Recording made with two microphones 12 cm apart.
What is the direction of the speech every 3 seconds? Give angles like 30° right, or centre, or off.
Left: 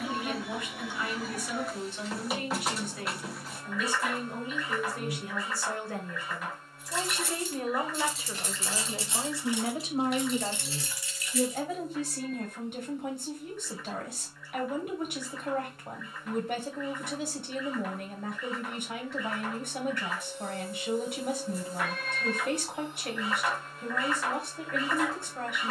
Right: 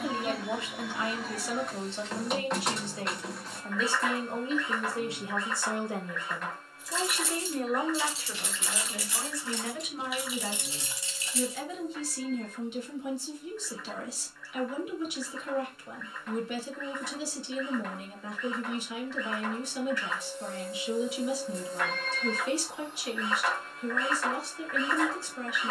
30° right, 30° right, centre, 40° left, 50° left, 50° left, 50° left, 50° left, 50° left.